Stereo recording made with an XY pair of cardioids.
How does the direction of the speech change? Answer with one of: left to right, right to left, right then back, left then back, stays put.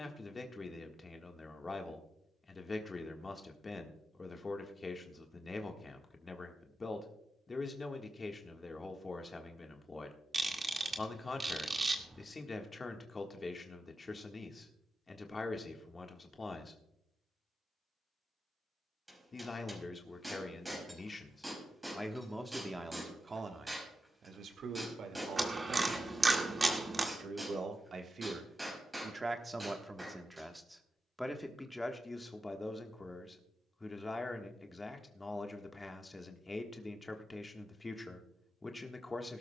right then back.